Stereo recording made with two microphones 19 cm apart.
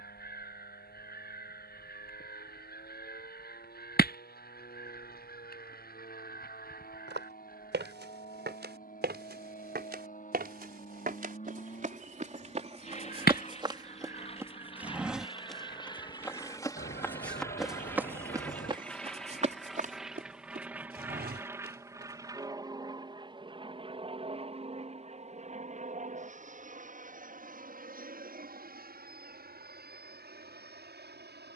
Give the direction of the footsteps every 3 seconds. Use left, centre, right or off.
off, off, right, right, right, centre, right, right, off, off, off.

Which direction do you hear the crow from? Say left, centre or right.
left.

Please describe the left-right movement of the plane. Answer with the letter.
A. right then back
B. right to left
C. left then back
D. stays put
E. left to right
E.